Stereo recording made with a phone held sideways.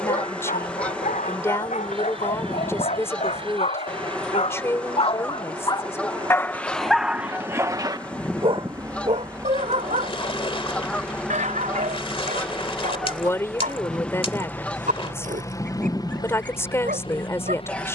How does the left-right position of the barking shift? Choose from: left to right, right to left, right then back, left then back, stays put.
left to right.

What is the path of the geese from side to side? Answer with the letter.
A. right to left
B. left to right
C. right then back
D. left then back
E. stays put
E.